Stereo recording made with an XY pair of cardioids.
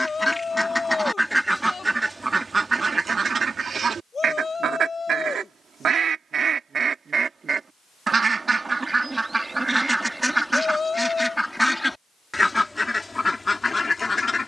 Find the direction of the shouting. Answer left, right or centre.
left.